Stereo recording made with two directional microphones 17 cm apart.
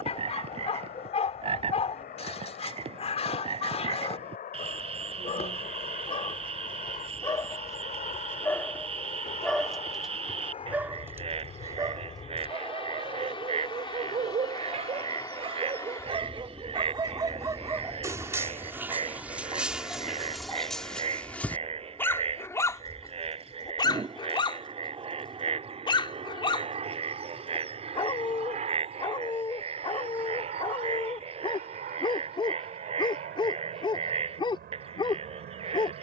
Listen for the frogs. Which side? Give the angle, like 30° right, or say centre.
30° right.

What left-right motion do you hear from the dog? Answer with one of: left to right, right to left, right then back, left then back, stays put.
right then back.